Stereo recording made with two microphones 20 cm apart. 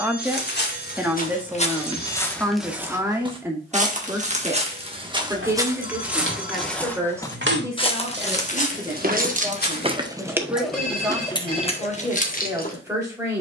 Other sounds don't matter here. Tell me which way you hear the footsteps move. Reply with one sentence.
You can hear the footsteps go right and come back.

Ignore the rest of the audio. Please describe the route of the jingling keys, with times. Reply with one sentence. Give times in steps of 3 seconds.
You can hear the jingling keys not at all from 0 s, on the right from 3 s, in the centre from 9 s and on the left from 12 s.